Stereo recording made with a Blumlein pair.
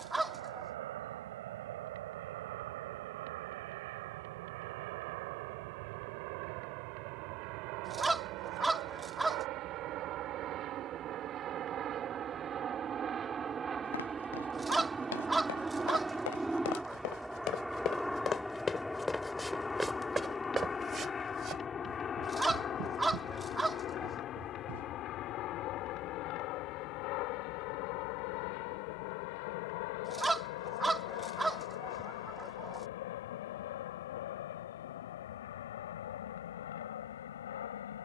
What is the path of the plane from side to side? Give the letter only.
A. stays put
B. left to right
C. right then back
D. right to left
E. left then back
D.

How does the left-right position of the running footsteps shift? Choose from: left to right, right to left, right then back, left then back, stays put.
left to right.